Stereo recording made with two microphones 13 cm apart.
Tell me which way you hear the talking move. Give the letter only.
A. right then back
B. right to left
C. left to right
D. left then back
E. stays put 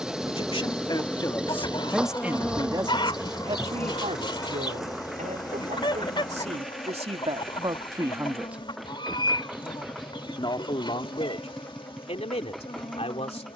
A.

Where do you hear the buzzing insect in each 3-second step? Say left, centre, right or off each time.
centre, left, left, left, left.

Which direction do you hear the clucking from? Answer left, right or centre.
left.